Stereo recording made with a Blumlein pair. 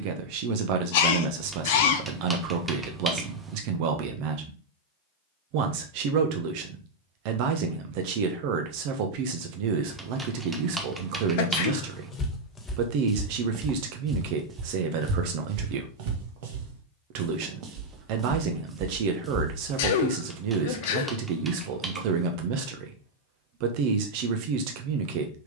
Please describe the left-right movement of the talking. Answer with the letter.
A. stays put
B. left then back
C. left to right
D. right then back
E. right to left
A.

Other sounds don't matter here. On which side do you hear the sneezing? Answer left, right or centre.
left.